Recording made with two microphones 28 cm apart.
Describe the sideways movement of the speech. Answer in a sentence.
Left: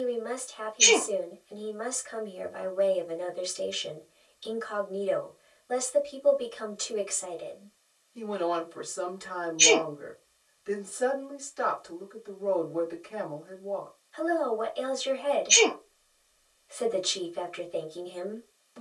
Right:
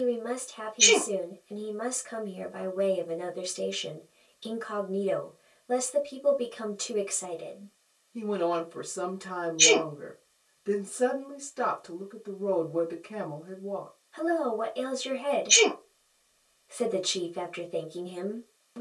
In this clip you hear the speech stay put.